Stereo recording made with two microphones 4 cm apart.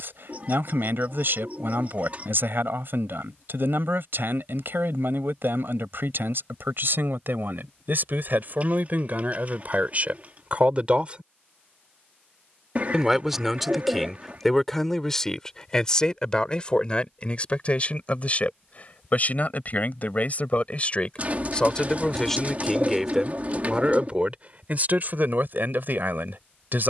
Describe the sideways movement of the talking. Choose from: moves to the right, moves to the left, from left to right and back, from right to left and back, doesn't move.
from right to left and back.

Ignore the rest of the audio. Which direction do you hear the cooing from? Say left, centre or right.
right.